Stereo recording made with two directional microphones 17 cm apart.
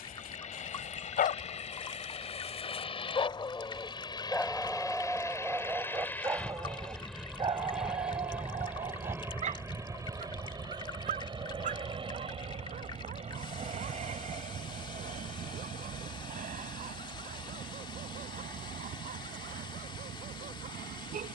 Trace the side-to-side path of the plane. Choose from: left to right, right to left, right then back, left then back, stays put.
left to right.